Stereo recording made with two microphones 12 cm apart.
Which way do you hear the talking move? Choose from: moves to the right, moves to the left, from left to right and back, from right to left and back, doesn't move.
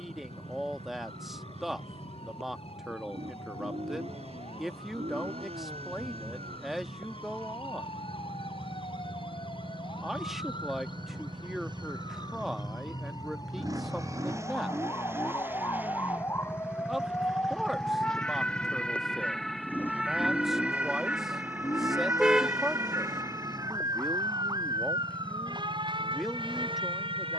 doesn't move.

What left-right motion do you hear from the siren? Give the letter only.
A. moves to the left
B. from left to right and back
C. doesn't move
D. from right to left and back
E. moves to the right
E.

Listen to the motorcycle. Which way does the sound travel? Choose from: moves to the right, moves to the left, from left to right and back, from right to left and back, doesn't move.
moves to the left.